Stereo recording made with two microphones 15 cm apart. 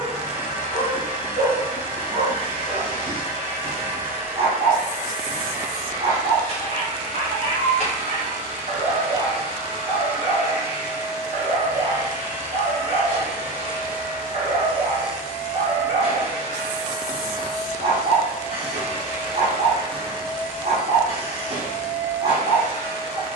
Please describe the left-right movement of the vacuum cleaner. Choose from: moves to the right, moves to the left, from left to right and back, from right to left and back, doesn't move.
doesn't move.